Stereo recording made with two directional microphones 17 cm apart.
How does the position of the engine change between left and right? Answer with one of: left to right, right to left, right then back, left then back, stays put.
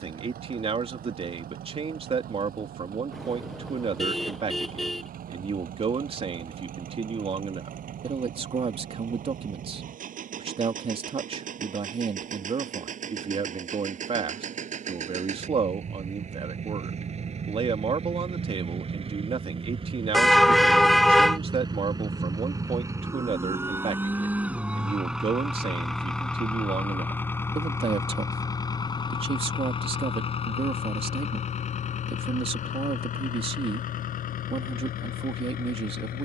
right to left.